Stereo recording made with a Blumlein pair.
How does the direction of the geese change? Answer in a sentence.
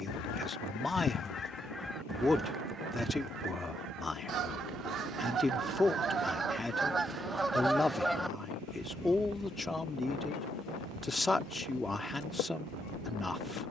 In this clip you hear the geese move from left to right and back again.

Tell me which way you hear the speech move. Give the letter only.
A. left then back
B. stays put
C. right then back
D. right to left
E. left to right
B.